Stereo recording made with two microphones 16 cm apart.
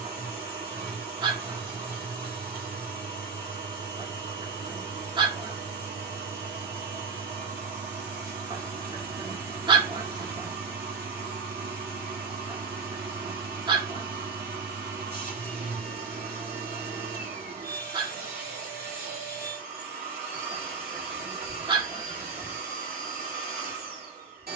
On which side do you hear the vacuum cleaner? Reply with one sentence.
In this clip you hear the vacuum cleaner on the right.